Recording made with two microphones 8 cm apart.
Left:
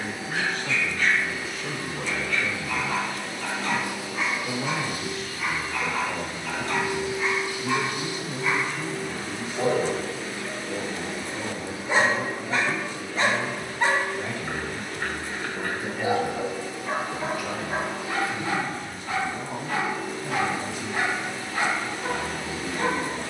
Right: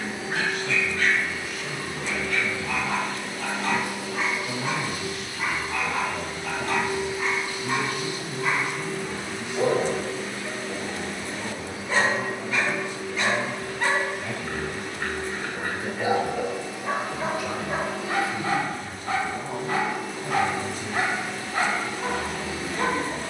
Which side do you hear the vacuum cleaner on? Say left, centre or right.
right.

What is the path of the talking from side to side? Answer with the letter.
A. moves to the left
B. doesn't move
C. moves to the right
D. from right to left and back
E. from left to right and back
C.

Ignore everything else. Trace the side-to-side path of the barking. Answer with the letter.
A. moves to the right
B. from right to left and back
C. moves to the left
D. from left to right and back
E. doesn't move
B.